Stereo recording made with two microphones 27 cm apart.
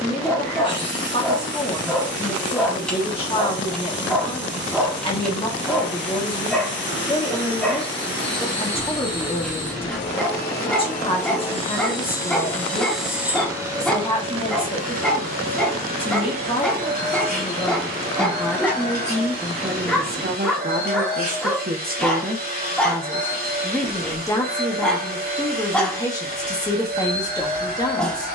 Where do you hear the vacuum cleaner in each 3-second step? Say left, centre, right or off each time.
left, left, left, left, centre, right, right, right, right, right.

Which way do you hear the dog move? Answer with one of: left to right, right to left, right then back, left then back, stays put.
stays put.